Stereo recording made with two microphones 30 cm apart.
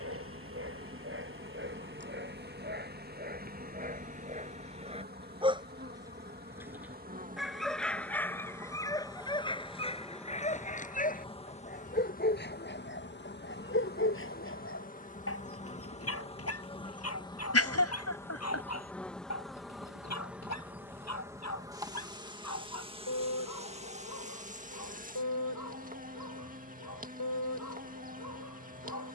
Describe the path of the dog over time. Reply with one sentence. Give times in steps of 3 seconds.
You can hear the dog on the right from 0 s, in the centre from 6 s and on the left from 9 s.